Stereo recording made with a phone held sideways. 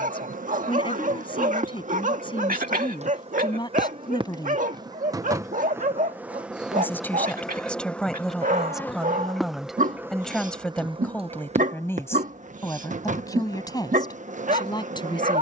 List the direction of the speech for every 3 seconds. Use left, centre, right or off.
left, left, centre, centre, left.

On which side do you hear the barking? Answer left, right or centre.
right.